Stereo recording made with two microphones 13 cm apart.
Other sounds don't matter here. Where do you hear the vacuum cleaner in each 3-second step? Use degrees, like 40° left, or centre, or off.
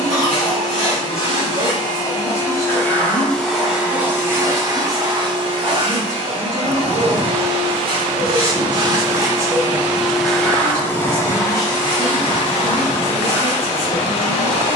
40° left, 20° right, 40° right, centre, 40° left.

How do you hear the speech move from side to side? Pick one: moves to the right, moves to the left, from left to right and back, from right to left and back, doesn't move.
doesn't move.